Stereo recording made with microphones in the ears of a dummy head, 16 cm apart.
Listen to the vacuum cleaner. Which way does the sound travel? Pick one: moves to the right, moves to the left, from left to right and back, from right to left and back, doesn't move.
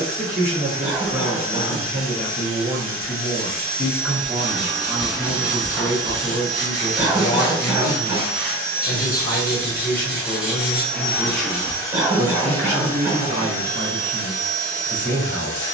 moves to the left.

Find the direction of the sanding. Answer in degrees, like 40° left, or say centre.
10° right.